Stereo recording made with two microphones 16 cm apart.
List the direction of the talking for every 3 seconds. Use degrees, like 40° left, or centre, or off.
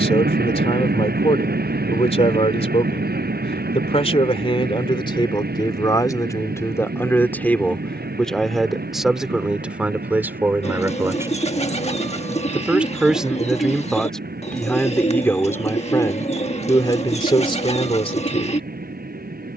40° left, 30° left, 10° left, 10° right, centre, 20° left, 40° left.